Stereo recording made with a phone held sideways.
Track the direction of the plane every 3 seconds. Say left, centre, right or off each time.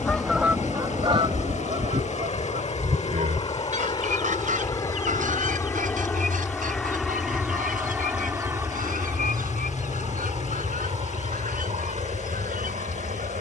left, left, centre, right, right.